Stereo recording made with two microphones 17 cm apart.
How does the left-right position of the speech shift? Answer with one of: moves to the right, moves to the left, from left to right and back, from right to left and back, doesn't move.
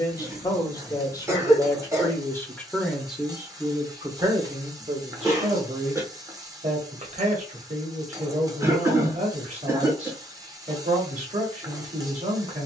moves to the right.